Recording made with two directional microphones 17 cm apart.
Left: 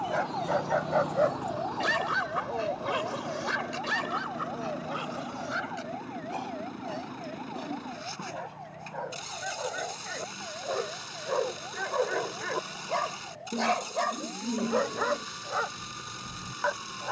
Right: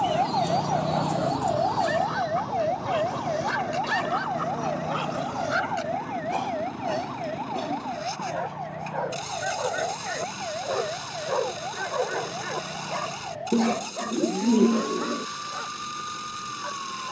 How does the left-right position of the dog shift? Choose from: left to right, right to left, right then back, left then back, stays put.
right then back.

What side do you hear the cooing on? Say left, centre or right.
right.